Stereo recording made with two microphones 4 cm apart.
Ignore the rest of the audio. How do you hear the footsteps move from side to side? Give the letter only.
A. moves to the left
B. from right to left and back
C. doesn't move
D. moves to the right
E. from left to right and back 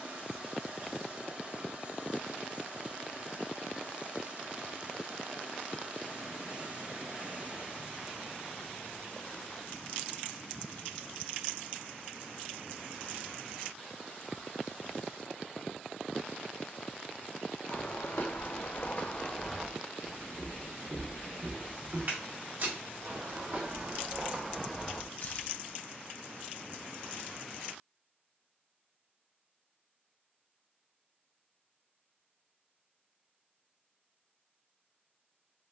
E.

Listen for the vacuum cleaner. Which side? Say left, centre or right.
right.